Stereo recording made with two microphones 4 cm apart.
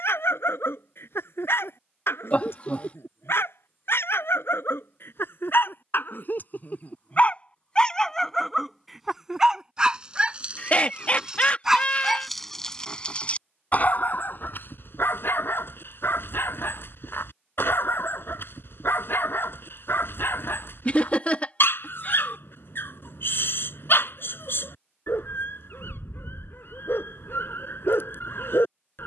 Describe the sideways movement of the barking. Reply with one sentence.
You can hear the barking move from left to right and back again.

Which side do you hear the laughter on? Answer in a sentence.
You can hear the laughter on the left.